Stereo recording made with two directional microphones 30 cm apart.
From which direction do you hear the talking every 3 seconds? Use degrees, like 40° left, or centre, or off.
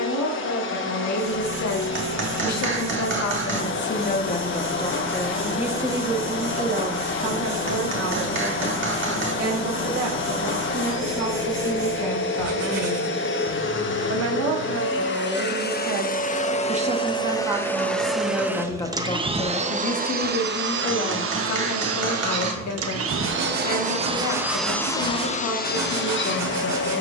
60° left, 20° left, 30° right, 60° right, 50° right, 20° right, 20° left, 60° left, 60° left.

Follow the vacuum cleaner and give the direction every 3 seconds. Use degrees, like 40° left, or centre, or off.
40° left, 40° left, 40° left, 40° left, 40° left, 20° left, 20° right, 40° right, 20° left.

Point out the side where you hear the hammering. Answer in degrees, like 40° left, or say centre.
40° right.